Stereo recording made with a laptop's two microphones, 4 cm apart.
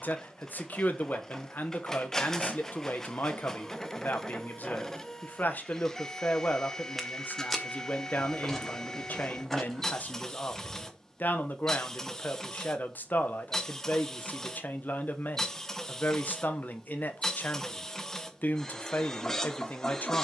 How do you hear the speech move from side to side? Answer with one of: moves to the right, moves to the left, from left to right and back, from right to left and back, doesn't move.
doesn't move.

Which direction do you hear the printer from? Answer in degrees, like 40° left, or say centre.
10° left.